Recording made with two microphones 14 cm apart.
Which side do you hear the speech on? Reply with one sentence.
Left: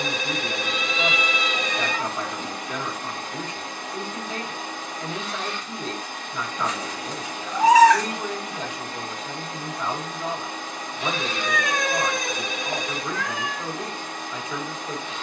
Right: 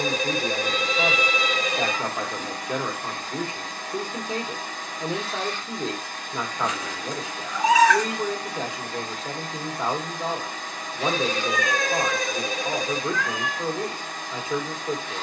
You can hear the speech on the right.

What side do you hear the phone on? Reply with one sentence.
In this clip you hear the phone on the right.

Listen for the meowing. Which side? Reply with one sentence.
You can hear the meowing on the left.